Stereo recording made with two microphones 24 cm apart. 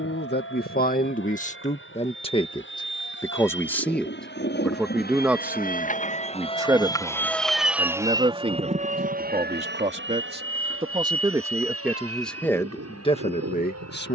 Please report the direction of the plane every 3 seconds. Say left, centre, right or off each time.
left, left, centre, right, right.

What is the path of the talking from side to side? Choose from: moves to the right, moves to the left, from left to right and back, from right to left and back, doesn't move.
from left to right and back.